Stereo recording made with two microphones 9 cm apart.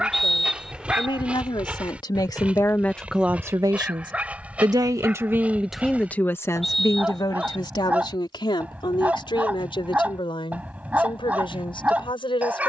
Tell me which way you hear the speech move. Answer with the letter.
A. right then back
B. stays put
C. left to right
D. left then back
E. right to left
A.